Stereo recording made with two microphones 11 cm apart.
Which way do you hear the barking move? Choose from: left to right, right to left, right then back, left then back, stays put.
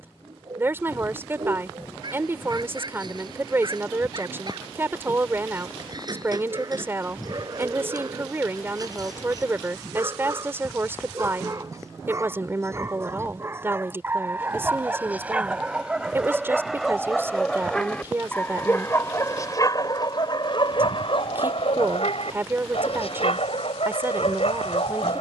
right to left.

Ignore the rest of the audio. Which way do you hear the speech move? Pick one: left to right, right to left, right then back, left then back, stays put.
stays put.